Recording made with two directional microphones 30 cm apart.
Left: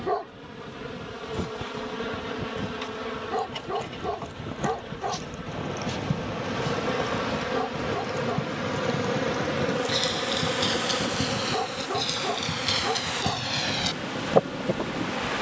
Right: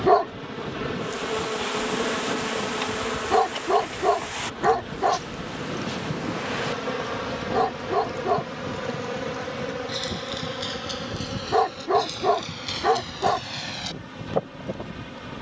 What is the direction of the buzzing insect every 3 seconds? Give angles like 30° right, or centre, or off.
40° right, 10° right, 10° left, 20° left, 30° left.